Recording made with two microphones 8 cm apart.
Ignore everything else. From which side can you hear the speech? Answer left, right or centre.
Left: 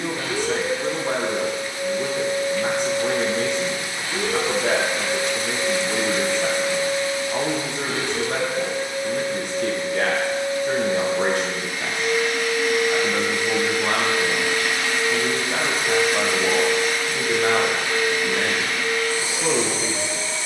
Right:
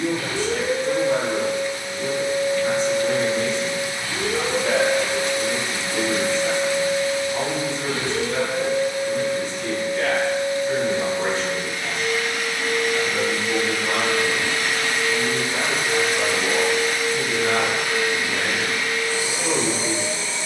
left.